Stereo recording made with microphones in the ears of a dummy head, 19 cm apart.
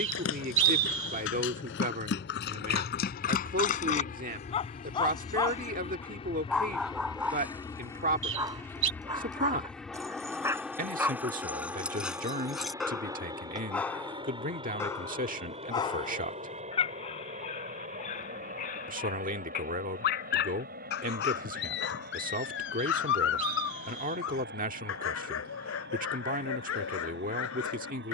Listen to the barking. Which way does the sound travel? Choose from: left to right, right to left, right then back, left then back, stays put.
right then back.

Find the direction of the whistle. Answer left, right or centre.
right.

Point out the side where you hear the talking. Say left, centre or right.
right.